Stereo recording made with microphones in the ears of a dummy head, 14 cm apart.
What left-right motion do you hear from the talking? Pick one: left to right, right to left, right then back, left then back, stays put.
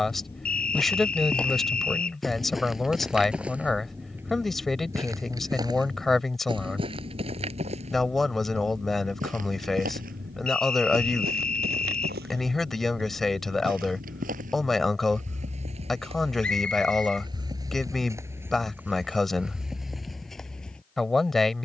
stays put.